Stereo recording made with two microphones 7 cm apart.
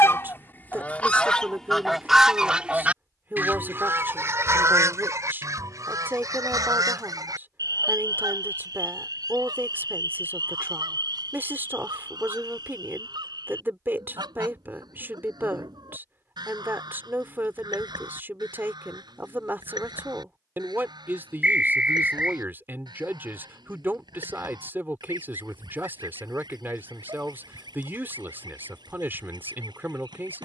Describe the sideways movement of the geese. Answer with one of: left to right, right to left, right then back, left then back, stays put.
left to right.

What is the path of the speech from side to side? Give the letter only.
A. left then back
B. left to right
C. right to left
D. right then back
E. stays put
E.